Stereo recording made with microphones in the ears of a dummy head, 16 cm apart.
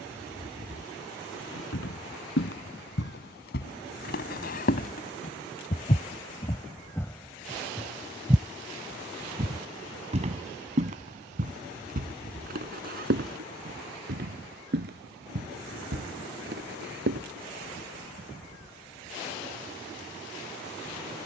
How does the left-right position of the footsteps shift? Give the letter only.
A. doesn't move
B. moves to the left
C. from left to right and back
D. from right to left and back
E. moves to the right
E.